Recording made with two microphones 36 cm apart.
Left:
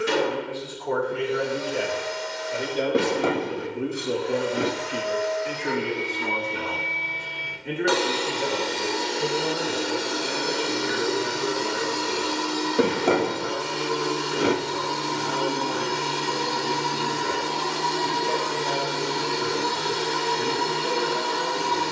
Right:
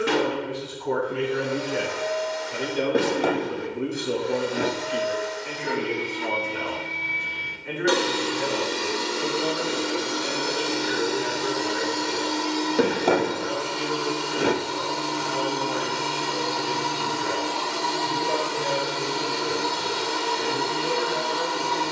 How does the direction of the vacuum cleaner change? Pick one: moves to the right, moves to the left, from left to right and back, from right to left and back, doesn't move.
moves to the left.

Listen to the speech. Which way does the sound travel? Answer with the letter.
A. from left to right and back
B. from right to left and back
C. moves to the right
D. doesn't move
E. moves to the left
E.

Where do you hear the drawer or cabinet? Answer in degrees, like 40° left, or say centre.
centre.